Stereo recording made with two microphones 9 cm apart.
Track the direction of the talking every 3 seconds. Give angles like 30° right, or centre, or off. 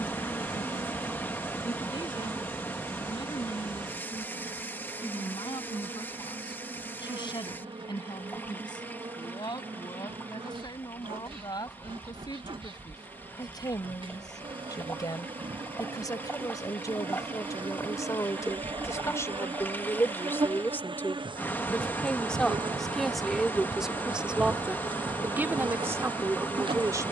60° left, 60° left, 60° left, 60° left, 50° left, 40° left, 30° left, 10° left, 20° right.